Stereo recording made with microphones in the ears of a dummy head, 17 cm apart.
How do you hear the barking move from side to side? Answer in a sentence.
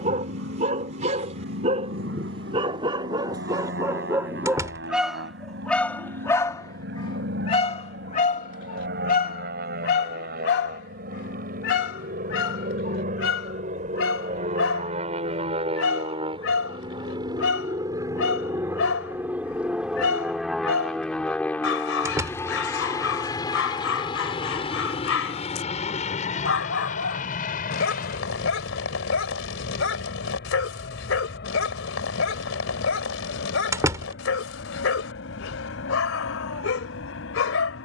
In this clip you hear the barking go from the right side to the left.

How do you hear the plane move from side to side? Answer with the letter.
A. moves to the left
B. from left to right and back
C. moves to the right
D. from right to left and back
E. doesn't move
A.